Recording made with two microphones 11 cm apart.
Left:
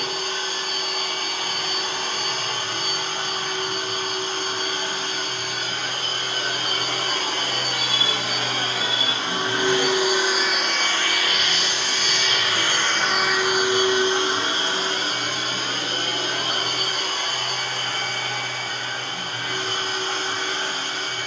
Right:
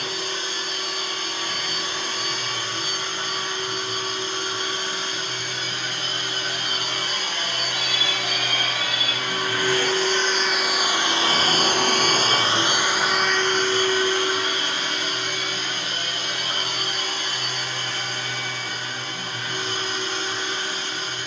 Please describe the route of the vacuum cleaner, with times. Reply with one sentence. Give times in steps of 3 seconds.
In this clip you hear the vacuum cleaner on the left from 0 s, in the centre from 9 s and on the left from 15 s.